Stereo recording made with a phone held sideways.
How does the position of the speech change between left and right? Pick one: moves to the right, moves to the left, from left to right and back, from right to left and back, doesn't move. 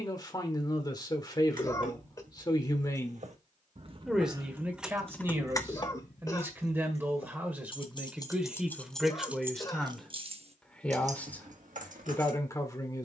from left to right and back.